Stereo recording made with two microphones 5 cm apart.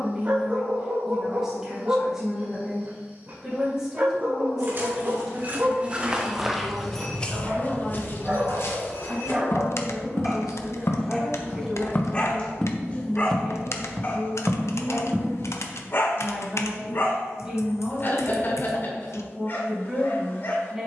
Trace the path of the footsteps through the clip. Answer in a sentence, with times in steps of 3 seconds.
In this clip you hear the footsteps not at all from 0 s, on the right from 3 s, on the left from 6 s, in the centre from 12 s, on the right from 15 s and not at all from 18 s.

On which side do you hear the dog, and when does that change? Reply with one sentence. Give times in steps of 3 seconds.
In this clip you hear the dog on the right from 0 s, in the centre from 9 s and on the left from 12 s.